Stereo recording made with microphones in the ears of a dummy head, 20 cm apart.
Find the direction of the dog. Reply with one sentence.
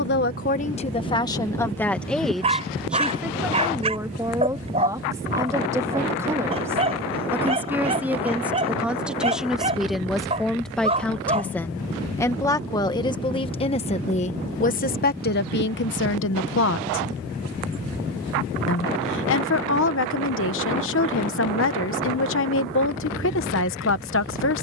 In this clip you hear the dog on the right.